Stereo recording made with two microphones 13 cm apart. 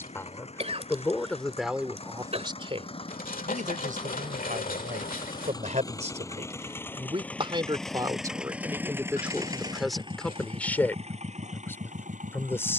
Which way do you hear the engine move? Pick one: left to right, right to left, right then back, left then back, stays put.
left to right.